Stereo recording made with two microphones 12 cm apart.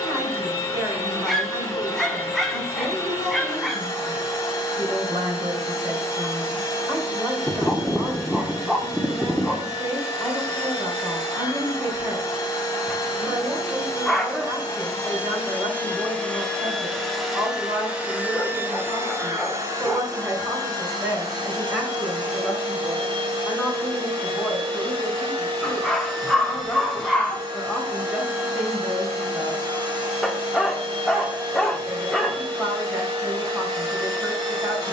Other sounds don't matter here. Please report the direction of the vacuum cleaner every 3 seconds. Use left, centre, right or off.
left, left, left, left, left, centre, right, right, right, right, right, right.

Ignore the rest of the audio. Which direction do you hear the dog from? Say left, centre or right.
centre.